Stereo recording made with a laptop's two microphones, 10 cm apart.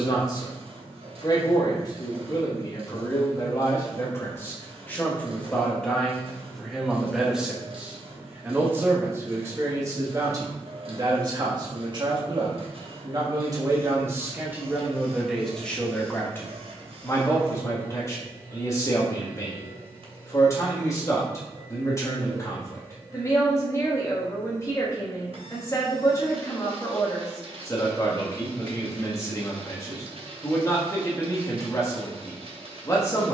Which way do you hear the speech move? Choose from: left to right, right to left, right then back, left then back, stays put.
right then back.